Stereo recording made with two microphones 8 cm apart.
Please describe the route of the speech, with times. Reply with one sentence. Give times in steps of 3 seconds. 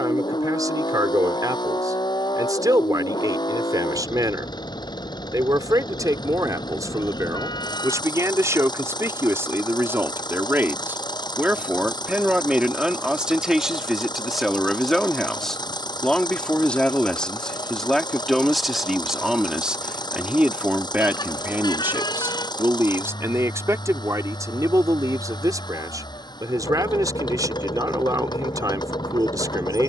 In this clip you hear the speech on the right from 0 s, in the centre from 12 s and on the right from 21 s.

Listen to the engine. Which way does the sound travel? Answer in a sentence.
You can hear the engine stay put.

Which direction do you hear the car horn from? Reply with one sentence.
You can hear the car horn on the left.